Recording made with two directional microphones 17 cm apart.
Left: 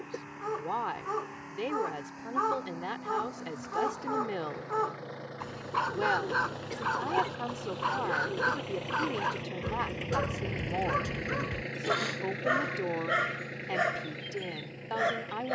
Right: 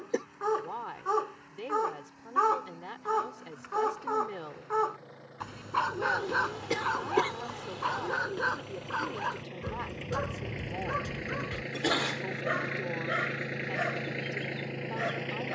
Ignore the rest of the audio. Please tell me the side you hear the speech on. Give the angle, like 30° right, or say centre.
30° left.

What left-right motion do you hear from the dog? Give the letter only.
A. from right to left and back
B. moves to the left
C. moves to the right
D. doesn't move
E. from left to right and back
B.